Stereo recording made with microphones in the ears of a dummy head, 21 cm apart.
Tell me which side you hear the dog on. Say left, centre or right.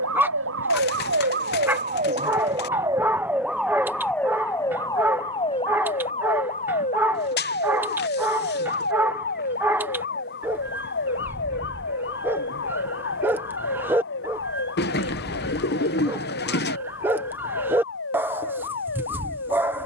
centre.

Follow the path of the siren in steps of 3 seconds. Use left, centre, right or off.
right, centre, left, left, left, left, left.